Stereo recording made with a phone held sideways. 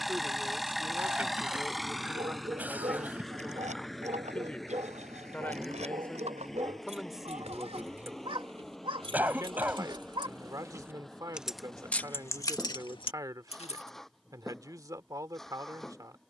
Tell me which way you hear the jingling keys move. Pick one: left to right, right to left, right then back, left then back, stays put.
right to left.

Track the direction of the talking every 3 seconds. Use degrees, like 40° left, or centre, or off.
10° right, 10° left, 10° right, 30° right, 30° right, 30° right.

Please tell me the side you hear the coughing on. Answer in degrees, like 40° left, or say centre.
10° right.